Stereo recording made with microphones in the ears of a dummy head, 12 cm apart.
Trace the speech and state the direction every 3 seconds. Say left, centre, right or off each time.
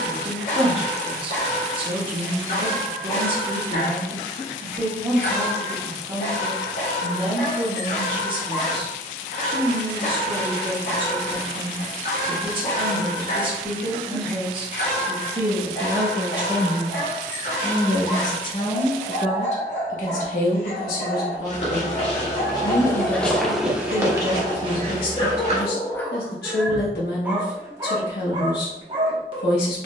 right, right, right, right, right, centre, left, left, left, left.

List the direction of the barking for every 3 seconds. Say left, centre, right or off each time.
left, left, left, left, left, left, left, left, left, right.